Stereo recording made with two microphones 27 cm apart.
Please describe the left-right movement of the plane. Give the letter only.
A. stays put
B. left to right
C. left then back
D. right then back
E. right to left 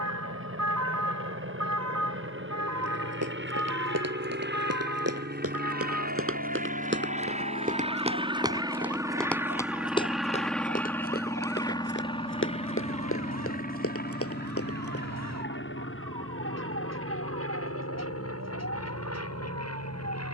E.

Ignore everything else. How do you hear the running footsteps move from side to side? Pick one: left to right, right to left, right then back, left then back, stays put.
right to left.